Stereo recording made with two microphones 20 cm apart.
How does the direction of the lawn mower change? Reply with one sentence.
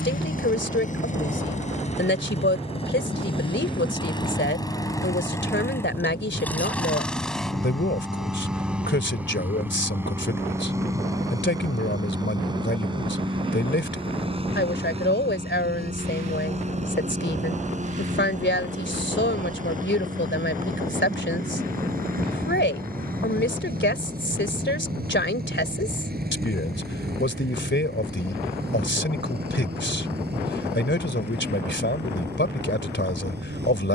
You can hear the lawn mower move from left to right.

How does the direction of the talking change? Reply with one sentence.
In this clip you hear the talking stay in one place.